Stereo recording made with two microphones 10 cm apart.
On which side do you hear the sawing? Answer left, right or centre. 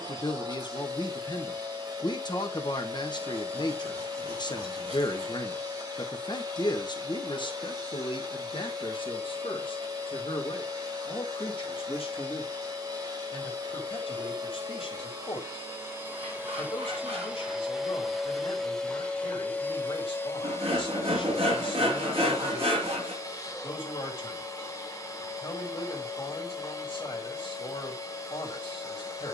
right.